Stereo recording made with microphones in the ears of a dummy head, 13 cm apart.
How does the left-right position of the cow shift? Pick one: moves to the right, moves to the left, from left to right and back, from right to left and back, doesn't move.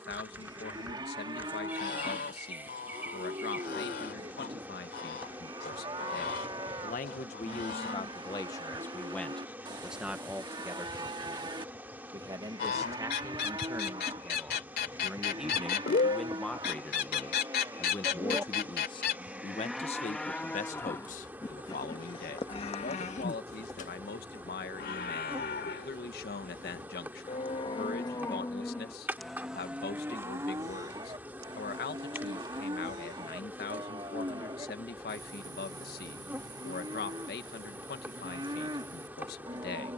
from right to left and back.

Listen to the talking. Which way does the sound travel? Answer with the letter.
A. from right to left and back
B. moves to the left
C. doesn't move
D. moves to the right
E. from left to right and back
E.